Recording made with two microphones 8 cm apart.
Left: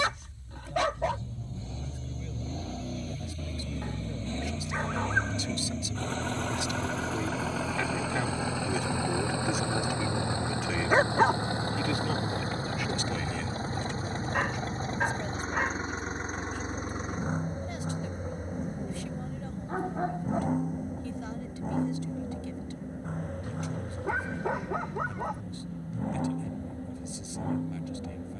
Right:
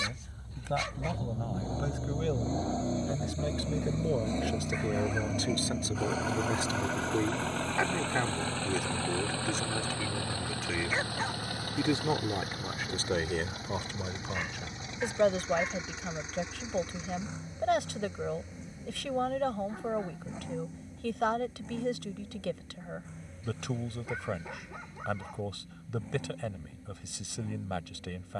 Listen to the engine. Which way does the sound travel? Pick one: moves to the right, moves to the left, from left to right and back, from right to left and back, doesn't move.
moves to the left.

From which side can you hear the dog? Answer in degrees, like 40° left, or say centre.
60° left.